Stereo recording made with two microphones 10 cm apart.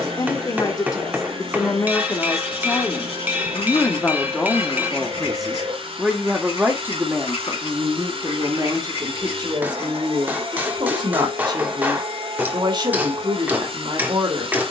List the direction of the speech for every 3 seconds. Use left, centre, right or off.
left, centre, right, right, right.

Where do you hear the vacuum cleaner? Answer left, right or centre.
right.